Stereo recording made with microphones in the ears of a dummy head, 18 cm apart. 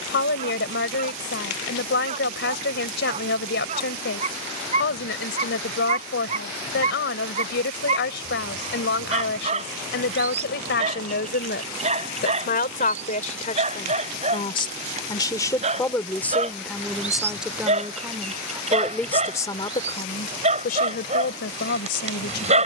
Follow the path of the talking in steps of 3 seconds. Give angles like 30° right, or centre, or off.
60° left, 60° left, 60° left, 60° left, 40° left, 10° left, 20° left, 60° left.